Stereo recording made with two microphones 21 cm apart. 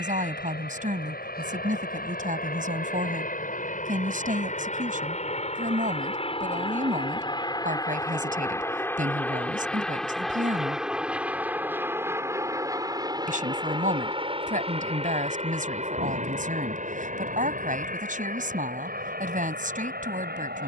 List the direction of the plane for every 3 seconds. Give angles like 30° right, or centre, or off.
50° left, 40° left, 20° left, centre, 20° right, 40° right, 50° right.